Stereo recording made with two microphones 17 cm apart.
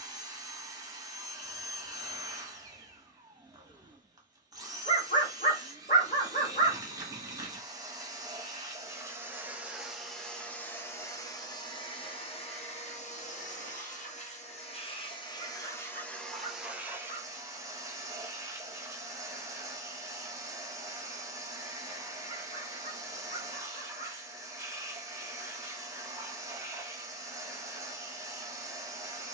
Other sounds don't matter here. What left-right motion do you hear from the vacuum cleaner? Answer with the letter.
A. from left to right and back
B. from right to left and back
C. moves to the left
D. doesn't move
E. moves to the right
B.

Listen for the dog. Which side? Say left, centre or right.
left.